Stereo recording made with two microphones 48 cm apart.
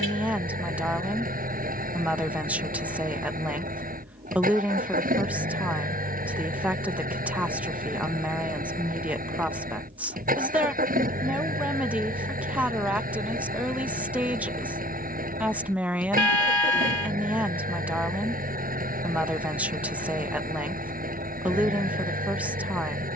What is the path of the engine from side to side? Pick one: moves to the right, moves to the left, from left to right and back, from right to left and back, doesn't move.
doesn't move.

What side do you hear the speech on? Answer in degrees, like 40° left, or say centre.
centre.